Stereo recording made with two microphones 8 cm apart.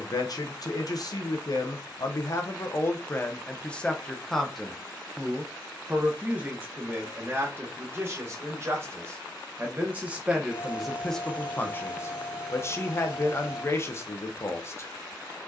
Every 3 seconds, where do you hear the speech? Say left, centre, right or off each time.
left, centre, right, centre, left.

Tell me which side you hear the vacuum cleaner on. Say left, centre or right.
centre.